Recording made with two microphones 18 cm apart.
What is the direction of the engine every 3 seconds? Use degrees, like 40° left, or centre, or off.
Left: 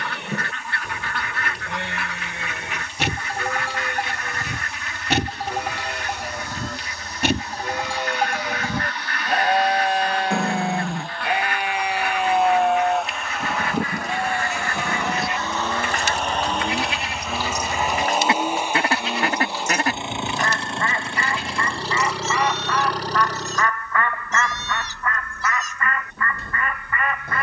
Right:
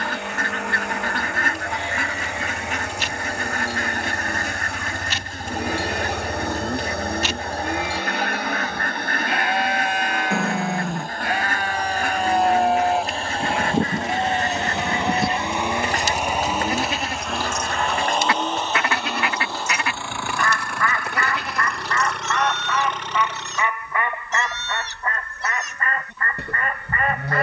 70° right, 70° right, 60° right, 50° right, 30° right, 10° right, 20° left, 30° left, 50° left.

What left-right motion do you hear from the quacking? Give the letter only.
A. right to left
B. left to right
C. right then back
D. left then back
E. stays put
D.